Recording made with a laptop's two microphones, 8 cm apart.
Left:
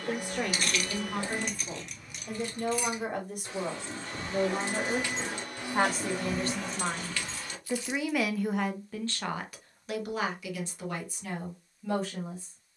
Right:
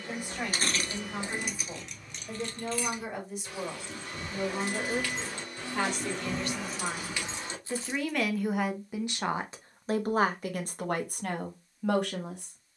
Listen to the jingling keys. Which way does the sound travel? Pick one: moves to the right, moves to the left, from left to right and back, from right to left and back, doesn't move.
from right to left and back.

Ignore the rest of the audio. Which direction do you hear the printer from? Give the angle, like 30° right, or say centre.
60° left.